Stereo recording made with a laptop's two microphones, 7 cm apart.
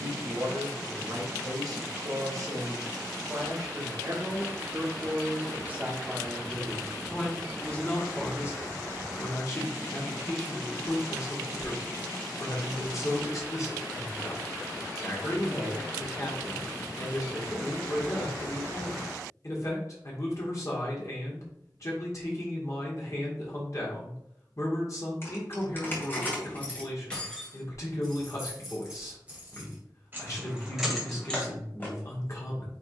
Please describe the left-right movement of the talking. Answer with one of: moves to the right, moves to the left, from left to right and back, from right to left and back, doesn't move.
moves to the left.